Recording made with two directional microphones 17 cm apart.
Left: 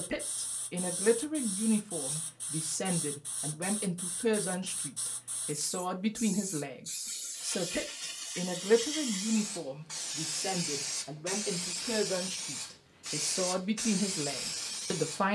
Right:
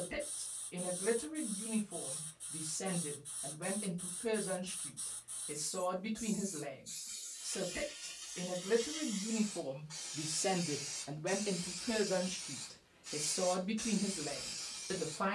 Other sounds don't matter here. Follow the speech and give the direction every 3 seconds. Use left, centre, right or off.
left, left, left, centre, left.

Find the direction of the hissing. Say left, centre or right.
left.